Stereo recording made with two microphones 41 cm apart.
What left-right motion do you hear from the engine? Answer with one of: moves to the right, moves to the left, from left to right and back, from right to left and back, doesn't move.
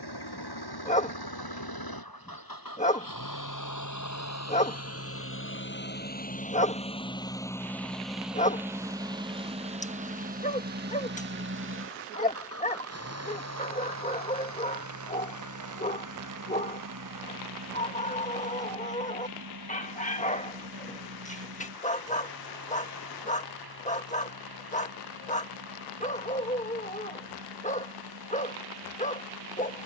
moves to the right.